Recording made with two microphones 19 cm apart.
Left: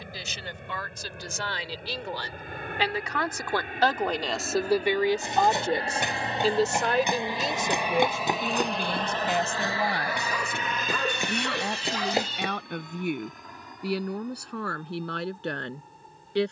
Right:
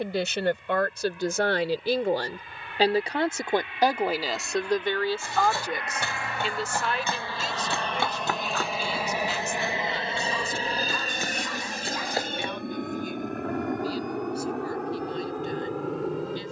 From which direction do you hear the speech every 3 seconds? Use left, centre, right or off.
right, centre, left, left, left, left.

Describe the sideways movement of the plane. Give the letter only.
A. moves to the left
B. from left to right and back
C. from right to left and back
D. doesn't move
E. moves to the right
E.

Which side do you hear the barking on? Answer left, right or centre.
left.